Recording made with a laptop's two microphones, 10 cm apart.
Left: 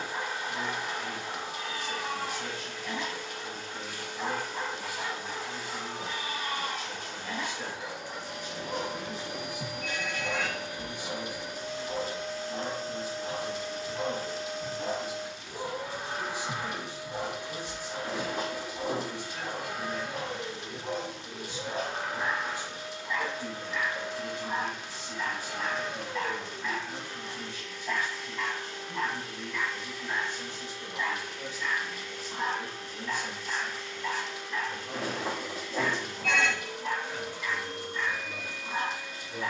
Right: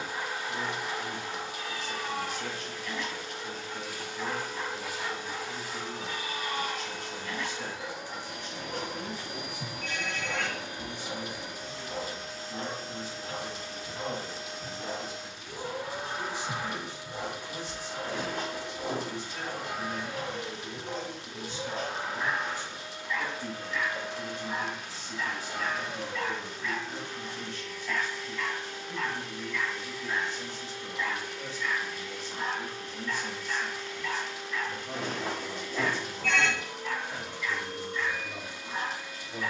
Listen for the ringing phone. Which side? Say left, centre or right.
centre.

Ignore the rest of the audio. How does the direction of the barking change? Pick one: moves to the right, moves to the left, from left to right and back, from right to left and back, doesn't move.
doesn't move.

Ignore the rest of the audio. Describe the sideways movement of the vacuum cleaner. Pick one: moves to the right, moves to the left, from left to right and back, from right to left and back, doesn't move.
doesn't move.